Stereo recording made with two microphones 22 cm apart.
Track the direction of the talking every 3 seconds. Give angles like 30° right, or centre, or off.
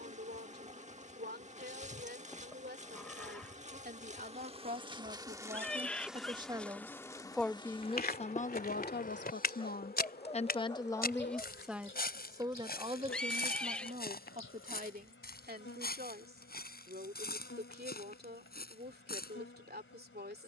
50° right, 40° right, 10° left, 20° left, 30° right, 40° right, 50° right.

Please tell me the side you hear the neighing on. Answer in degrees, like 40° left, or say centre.
centre.